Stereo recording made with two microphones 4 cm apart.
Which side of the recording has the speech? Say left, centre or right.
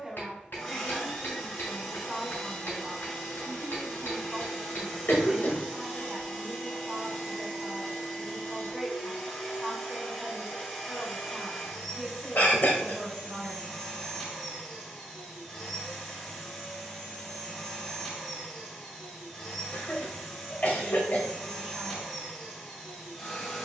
centre.